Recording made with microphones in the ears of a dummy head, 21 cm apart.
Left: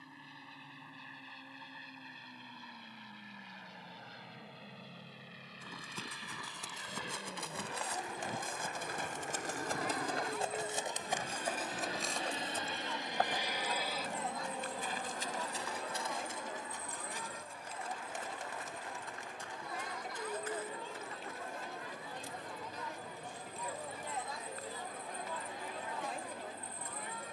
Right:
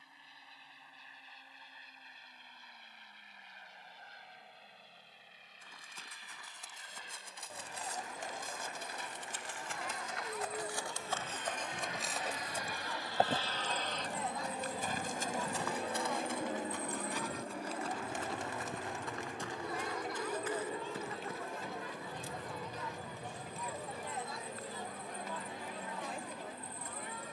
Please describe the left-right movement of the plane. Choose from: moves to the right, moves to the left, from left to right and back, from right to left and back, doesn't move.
moves to the right.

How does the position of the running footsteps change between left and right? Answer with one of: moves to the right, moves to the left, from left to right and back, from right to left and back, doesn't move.
moves to the right.